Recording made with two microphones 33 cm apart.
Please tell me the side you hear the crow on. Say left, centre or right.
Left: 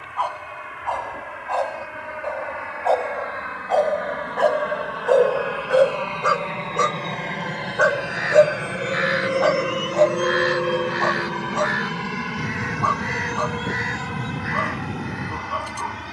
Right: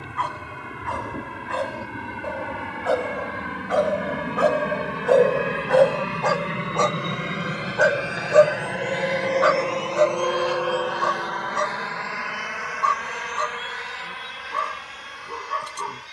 left.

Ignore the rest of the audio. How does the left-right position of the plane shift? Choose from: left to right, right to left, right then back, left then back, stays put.
right to left.